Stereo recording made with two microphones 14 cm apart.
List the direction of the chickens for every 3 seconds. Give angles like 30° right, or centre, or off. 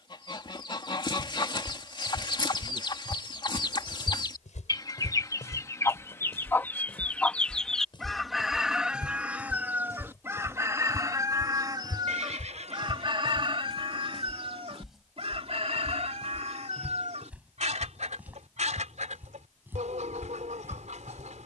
30° left, 30° left, 10° left, 20° right, 40° right, 50° right, 60° right.